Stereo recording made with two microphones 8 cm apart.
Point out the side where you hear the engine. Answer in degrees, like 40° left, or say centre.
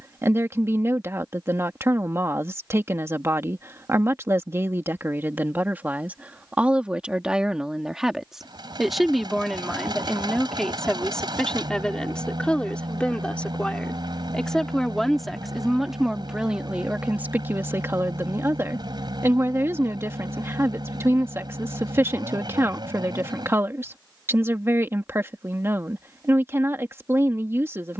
60° right.